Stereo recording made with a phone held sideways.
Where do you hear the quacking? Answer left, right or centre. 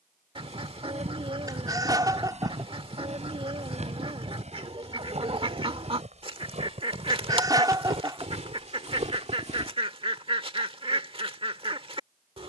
right.